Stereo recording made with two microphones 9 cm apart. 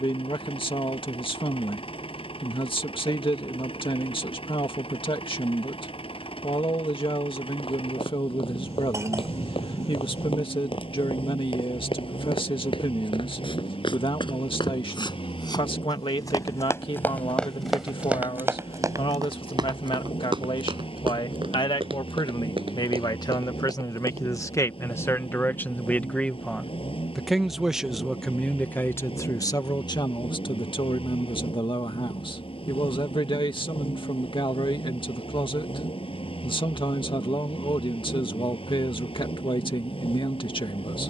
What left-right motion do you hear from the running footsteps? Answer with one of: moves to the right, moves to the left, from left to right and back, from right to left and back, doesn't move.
moves to the right.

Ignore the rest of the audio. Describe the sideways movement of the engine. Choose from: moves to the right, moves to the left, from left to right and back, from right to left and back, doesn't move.
doesn't move.